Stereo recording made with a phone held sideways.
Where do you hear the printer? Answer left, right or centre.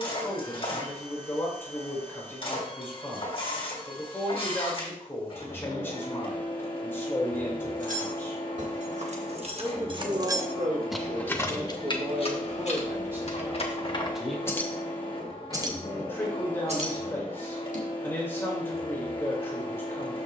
left.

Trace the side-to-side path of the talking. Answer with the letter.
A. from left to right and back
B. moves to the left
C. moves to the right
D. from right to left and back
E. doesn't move
A.